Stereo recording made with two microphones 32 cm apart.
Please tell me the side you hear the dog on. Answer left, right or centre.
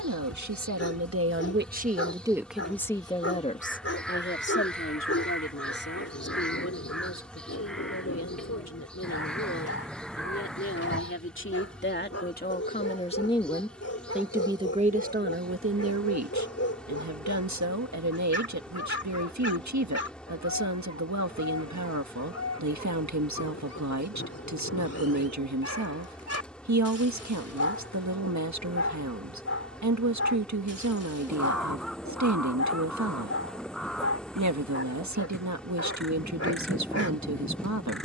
left.